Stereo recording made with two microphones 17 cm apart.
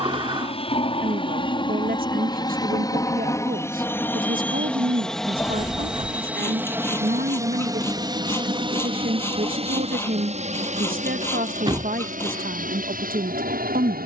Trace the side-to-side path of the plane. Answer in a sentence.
You can hear the plane move to the right.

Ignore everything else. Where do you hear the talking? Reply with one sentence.
In this clip you hear the talking on the right.